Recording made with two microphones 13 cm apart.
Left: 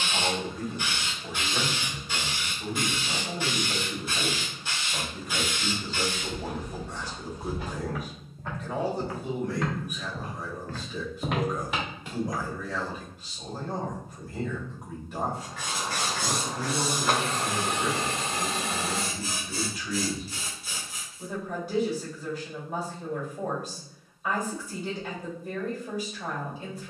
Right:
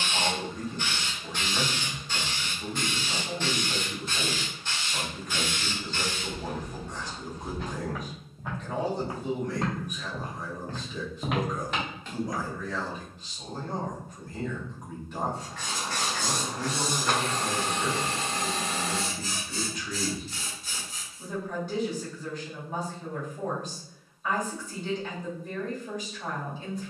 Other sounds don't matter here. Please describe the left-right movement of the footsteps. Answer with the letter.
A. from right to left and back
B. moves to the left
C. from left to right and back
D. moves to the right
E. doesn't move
C.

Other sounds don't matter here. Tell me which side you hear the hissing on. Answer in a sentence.
In this clip you hear the hissing in the centre.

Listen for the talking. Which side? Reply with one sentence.
In this clip you hear the talking in the centre.